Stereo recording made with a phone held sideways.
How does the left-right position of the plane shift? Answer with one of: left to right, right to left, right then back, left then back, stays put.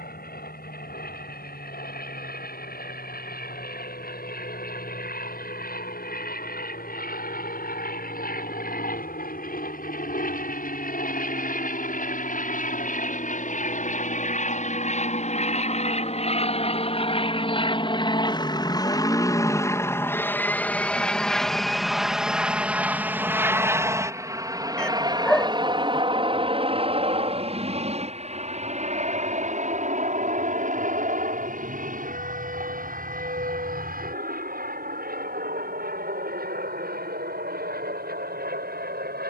left to right.